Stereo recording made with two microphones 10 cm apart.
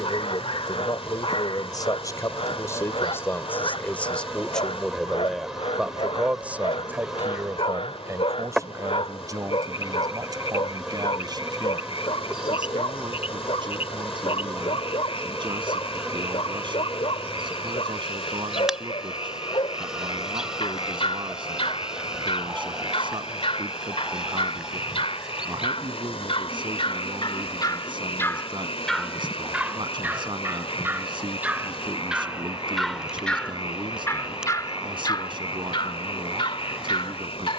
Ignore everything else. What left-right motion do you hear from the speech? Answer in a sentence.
In this clip you hear the speech go from the left side to the right.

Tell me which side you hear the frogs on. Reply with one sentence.
You can hear the frogs on the left.